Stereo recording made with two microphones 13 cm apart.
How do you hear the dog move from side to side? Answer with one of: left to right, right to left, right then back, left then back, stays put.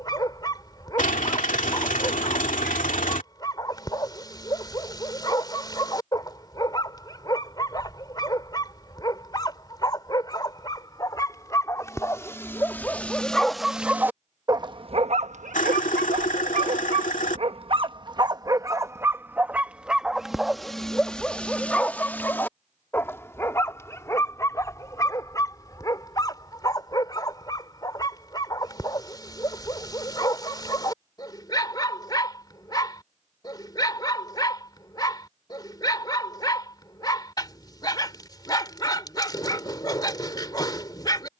right then back.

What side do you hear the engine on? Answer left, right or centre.
left.